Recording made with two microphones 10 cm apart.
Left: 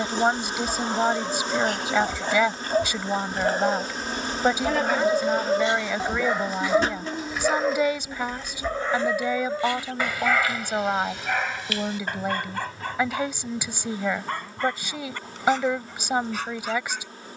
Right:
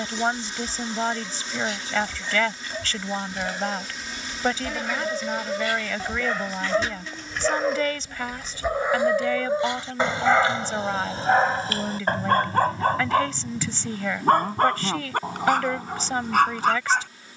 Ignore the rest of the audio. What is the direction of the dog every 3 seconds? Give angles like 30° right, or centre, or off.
50° left, 40° left, centre, 30° right, 50° right, 60° right.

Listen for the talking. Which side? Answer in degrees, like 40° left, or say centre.
10° left.